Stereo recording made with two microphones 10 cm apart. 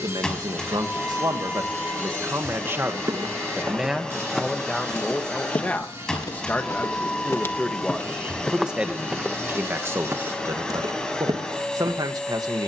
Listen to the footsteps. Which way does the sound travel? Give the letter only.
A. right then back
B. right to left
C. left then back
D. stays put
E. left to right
C.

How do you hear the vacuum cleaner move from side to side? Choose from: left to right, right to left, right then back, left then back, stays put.
stays put.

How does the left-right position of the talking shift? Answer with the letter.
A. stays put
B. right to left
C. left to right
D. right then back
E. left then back
E.